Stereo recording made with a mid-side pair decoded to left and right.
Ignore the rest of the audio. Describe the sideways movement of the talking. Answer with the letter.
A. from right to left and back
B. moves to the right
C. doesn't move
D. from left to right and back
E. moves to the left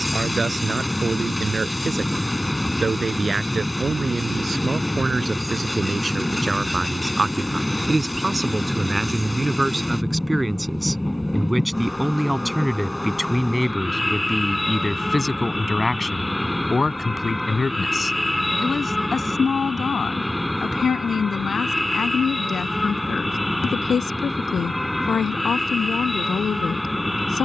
E.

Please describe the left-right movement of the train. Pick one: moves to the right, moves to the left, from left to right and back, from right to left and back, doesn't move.
doesn't move.